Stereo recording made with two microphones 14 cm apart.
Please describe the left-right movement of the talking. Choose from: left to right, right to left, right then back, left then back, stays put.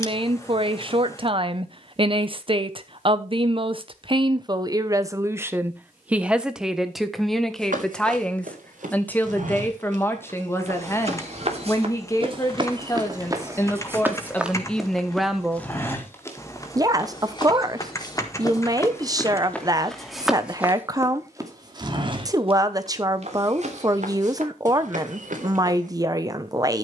left then back.